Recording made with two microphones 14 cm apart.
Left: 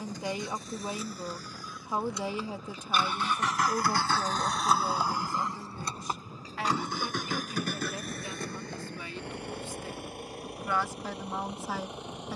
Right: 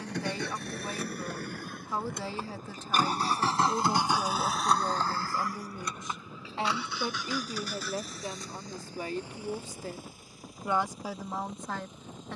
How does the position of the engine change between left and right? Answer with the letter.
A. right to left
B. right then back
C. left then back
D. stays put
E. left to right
A.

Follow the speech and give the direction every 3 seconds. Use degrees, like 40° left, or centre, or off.
20° left, centre, 30° right, 20° right.